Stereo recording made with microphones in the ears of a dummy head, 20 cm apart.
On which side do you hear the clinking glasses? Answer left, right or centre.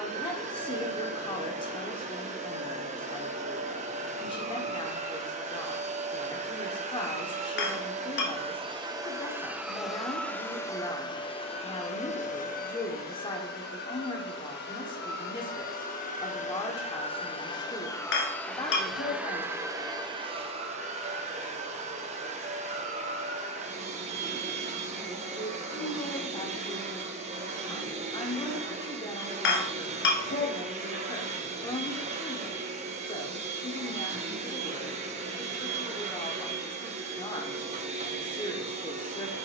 left.